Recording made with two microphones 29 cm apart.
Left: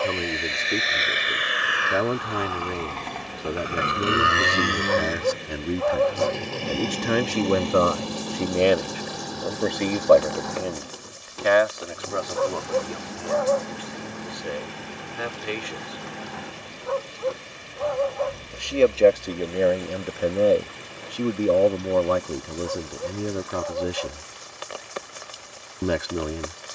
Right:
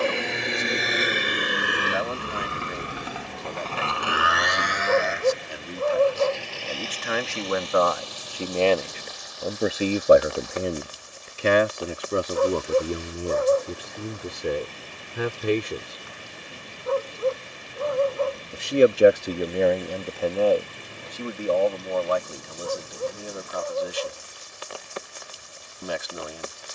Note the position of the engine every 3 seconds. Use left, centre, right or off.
right, left, left, left, left, left, left, left, left.